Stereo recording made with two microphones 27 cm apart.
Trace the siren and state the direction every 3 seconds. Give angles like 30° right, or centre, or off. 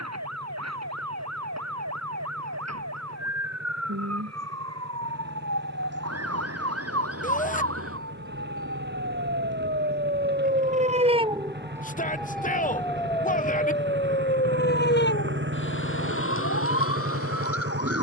80° right, 70° right, 60° right, 30° right, 20° left, 50° left.